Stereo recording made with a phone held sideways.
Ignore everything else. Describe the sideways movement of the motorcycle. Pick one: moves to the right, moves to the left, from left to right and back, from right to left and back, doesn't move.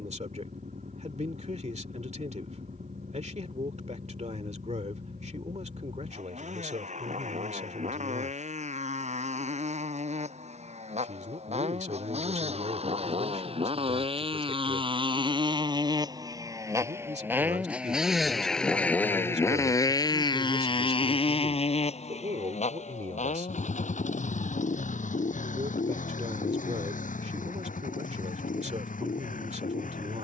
moves to the left.